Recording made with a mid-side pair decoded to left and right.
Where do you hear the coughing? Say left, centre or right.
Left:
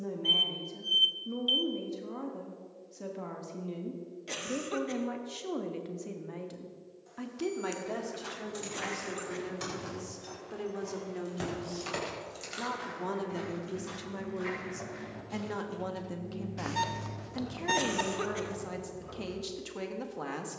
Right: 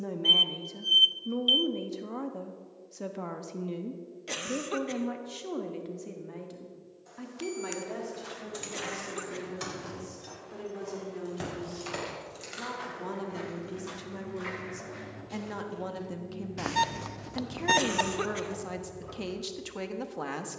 right.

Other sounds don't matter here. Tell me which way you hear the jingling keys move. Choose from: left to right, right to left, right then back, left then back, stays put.
left then back.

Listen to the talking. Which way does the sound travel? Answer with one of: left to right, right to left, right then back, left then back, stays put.
left then back.